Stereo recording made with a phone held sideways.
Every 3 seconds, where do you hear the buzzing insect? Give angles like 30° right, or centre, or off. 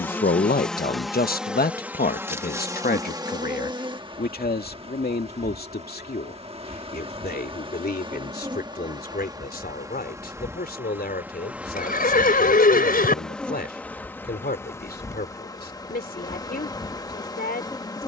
10° right, 30° right, 30° right, 20° right, 10° left, 20° left.